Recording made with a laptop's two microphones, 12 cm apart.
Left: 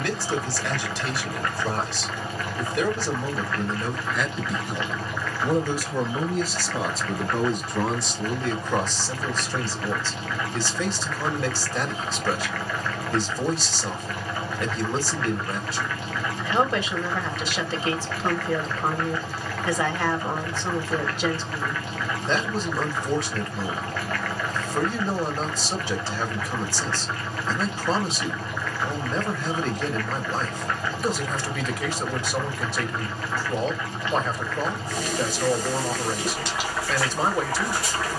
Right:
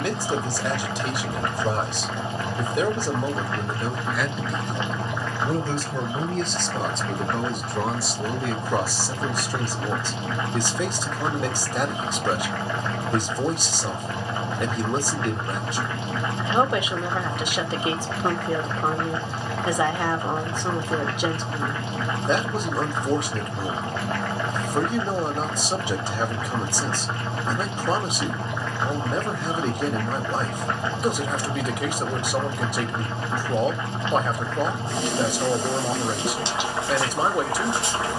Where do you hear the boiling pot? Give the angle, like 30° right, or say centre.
20° right.